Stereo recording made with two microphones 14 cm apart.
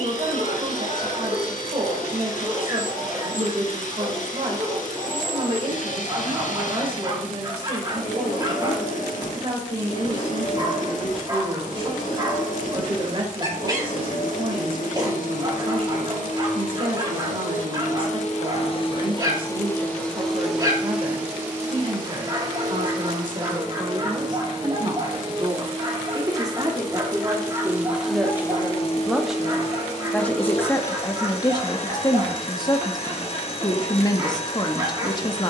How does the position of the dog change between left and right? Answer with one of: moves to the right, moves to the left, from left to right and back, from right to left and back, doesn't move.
doesn't move.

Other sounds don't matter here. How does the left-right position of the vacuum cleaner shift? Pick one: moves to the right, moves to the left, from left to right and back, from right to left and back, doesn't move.
from left to right and back.